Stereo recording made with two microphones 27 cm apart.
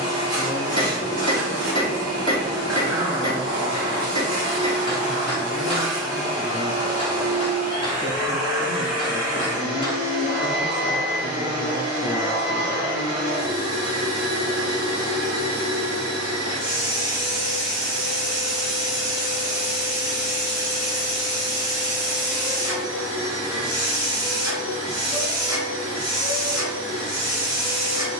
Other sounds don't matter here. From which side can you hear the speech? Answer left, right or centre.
left.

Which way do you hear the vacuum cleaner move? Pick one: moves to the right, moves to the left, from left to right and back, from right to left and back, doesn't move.
doesn't move.